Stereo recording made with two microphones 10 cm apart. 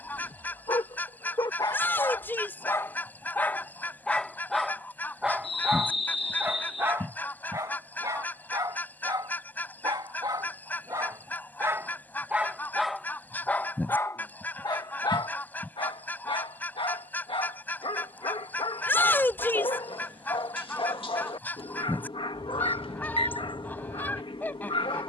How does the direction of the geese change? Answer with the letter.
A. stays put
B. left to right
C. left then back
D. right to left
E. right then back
A.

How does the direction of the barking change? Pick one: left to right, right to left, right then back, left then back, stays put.
right then back.